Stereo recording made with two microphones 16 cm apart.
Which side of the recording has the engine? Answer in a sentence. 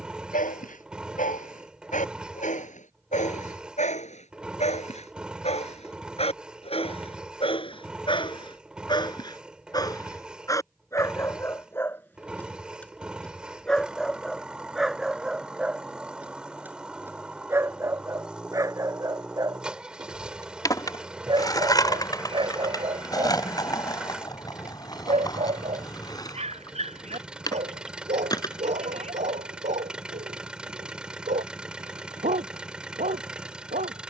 In this clip you hear the engine in the centre.